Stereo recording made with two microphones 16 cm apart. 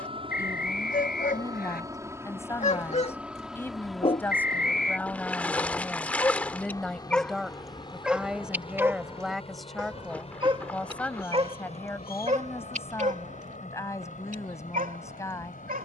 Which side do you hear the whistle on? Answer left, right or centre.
left.